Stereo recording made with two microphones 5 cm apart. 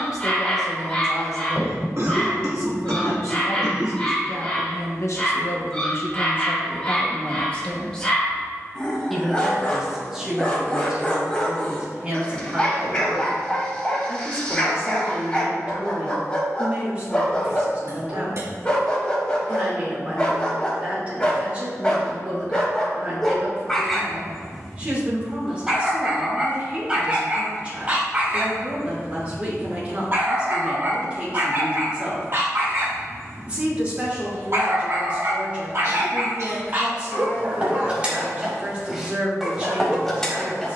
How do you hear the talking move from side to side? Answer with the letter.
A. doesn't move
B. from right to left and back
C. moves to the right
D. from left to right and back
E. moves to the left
C.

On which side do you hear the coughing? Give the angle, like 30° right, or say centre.
60° right.